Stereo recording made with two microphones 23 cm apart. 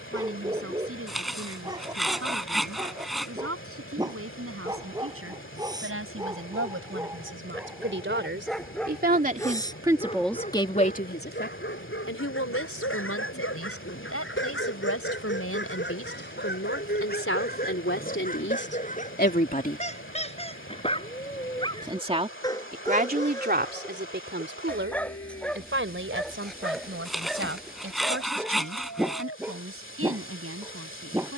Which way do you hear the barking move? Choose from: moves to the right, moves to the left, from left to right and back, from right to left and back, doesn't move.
from right to left and back.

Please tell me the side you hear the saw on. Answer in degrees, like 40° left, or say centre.
centre.